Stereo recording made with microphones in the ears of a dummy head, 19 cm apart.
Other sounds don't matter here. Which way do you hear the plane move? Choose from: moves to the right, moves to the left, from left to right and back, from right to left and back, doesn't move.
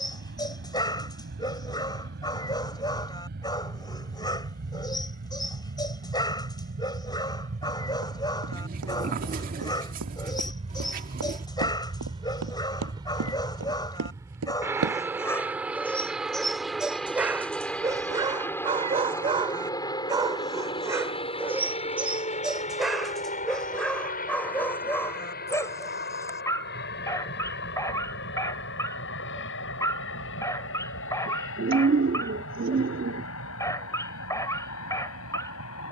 moves to the left.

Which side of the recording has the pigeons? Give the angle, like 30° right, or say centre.
40° right.